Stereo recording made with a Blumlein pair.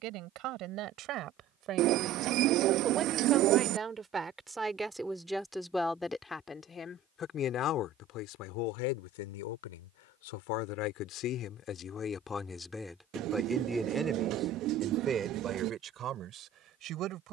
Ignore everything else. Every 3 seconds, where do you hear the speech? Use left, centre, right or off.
right, centre, left, left, centre, right.